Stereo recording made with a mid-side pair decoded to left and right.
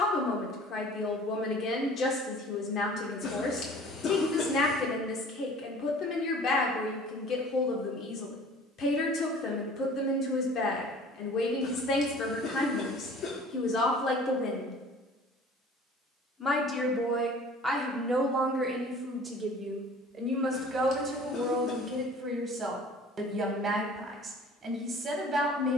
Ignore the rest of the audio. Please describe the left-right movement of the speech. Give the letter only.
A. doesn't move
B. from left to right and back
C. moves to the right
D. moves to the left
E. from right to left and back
C.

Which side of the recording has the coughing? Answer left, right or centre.
left.